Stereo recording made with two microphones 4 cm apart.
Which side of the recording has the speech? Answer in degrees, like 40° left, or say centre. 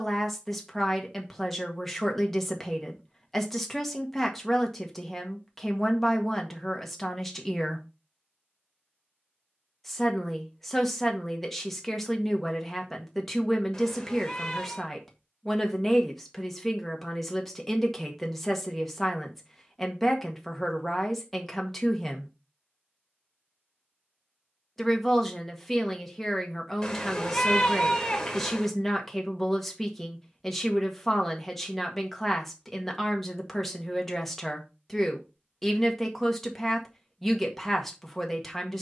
10° left.